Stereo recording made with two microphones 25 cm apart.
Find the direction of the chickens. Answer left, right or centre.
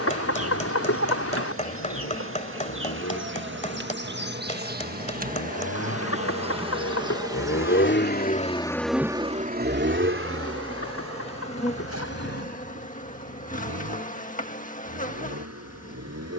left.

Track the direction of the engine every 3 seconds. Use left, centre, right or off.
left, left, left, right, right, right.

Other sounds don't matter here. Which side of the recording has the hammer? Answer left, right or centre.
left.